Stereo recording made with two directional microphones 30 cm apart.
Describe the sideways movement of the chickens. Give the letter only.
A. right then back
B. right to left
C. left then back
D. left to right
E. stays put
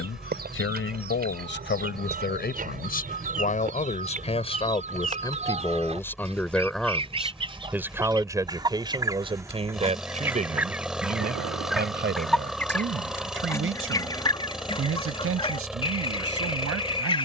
B.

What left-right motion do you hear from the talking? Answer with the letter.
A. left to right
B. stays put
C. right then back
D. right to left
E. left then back
A.